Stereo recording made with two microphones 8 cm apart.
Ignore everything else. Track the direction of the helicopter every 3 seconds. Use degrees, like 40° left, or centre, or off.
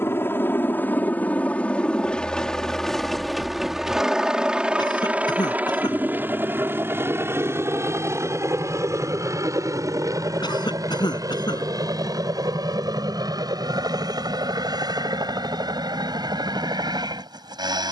20° left, 10° right, 40° right, 50° right, 60° right, 60° right.